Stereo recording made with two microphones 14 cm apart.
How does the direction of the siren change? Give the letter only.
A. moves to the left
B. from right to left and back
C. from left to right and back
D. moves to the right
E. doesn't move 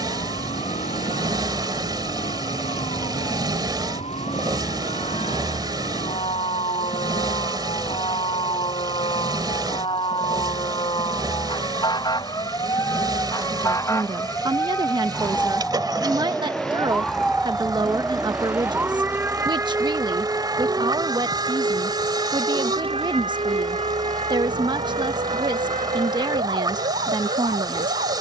D.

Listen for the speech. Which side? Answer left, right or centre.
right.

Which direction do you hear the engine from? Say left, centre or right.
right.